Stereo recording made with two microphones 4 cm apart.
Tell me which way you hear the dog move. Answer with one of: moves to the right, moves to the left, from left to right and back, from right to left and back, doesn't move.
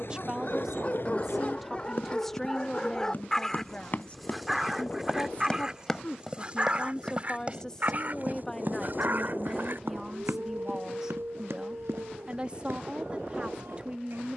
moves to the right.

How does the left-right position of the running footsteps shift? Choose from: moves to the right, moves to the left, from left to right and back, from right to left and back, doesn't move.
moves to the right.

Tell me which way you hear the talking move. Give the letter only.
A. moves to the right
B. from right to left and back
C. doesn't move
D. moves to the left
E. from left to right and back
B.